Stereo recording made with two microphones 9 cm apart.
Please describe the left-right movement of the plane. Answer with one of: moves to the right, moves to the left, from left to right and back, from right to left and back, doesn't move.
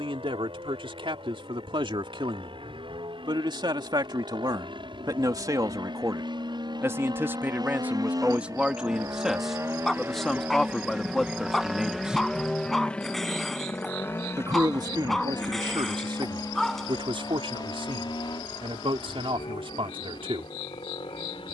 moves to the left.